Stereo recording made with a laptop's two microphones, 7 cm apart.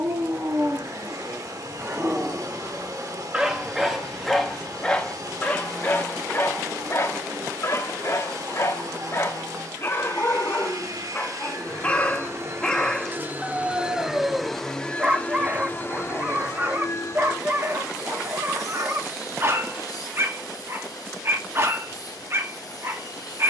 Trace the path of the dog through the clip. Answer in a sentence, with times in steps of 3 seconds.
You can hear the dog on the right from 0 s, in the centre from 3 s, on the left from 6 s, in the centre from 12 s and on the right from 15 s.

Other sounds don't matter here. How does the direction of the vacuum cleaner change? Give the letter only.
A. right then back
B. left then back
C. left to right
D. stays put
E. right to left
E.